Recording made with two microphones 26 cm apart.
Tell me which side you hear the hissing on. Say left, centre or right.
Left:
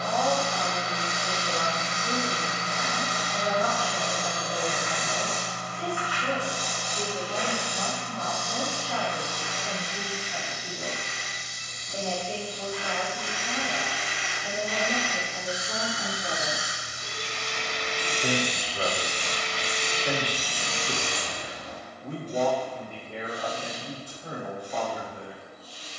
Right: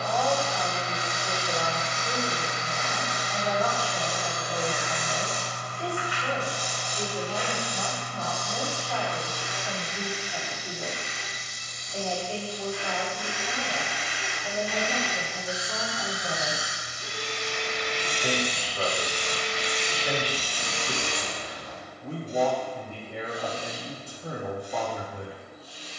left.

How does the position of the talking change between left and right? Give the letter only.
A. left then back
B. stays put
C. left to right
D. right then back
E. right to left
C.